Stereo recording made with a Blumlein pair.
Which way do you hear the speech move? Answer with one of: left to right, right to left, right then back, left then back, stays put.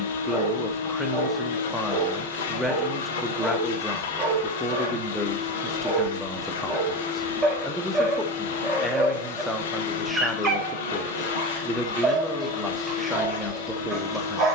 stays put.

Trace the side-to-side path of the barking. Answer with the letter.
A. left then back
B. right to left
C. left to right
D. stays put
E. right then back
D.